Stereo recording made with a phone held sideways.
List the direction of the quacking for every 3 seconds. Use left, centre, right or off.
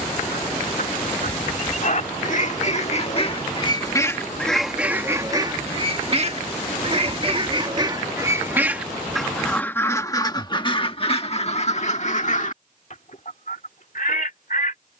left, centre, right, left, left.